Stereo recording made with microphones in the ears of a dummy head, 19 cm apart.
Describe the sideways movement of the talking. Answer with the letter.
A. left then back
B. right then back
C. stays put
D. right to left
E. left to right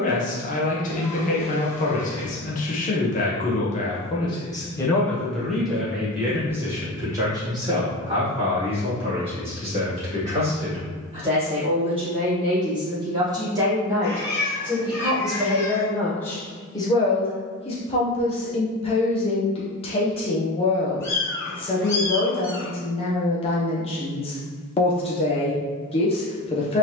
B.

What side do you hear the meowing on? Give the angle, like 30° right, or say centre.
10° left.